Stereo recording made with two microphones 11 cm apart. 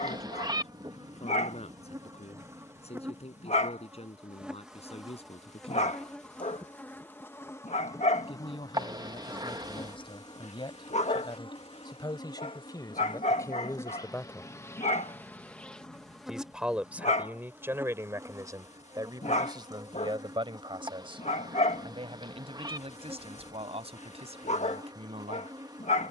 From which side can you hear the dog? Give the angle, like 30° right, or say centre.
80° left.